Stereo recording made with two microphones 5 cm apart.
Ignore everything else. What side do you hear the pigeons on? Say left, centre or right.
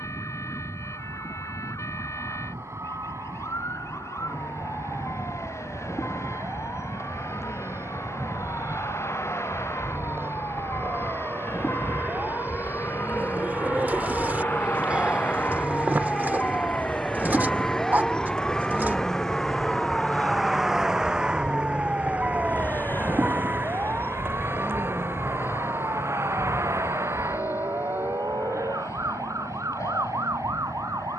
right.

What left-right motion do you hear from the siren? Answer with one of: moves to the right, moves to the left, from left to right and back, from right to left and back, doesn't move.
moves to the right.